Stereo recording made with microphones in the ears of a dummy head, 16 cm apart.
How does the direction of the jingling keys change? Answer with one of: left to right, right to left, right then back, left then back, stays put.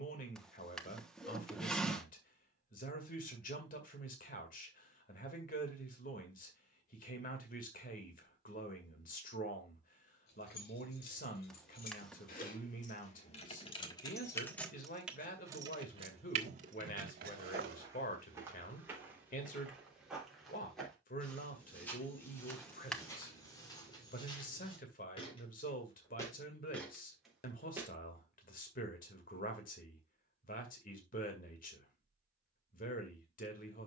left to right.